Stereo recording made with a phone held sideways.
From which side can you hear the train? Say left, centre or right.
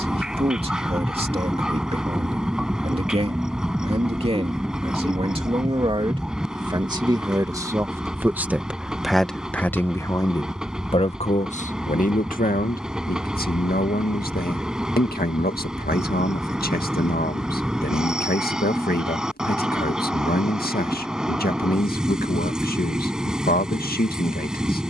centre.